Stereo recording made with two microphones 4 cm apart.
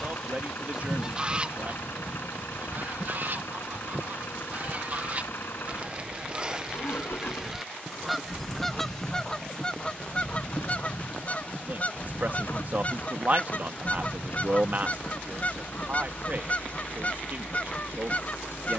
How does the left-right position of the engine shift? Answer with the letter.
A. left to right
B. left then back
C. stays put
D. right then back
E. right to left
C.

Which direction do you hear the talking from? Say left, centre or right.
right.